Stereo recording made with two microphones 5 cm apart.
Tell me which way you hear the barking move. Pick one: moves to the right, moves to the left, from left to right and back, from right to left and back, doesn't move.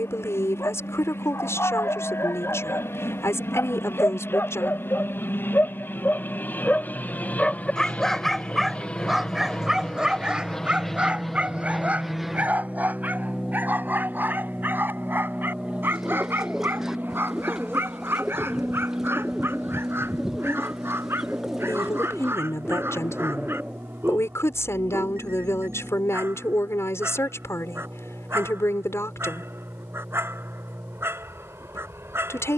moves to the right.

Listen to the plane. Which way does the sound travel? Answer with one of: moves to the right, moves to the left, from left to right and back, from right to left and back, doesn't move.
moves to the right.